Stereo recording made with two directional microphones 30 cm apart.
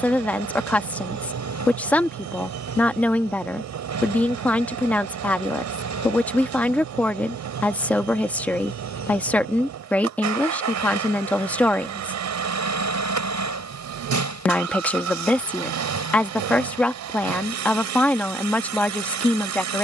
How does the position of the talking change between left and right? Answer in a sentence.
You can hear the talking stay in one place.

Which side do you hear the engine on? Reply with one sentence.
In this clip you hear the engine on the right.